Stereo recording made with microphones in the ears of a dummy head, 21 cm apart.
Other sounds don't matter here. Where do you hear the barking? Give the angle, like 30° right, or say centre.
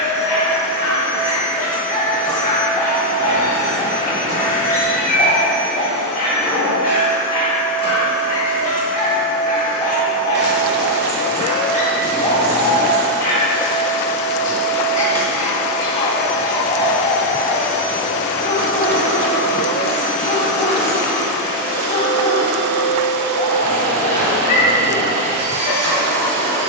30° left.